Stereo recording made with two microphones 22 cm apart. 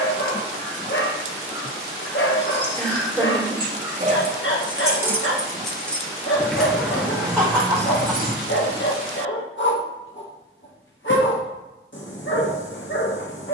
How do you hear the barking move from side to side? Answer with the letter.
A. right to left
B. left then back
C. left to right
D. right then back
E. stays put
E.